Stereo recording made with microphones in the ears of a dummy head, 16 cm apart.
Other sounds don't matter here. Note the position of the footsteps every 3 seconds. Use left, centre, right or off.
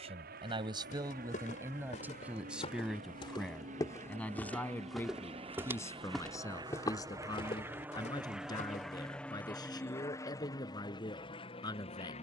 left, centre, left, off.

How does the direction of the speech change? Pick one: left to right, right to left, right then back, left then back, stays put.
right to left.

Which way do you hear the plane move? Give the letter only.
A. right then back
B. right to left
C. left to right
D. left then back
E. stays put
B.